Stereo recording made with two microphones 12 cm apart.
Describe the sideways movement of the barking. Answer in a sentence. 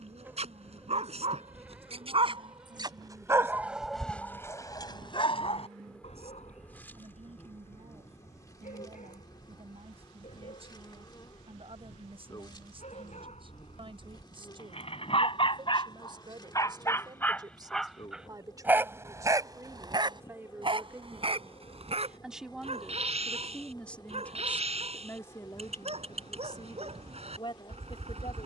You can hear the barking move from right to left and back again.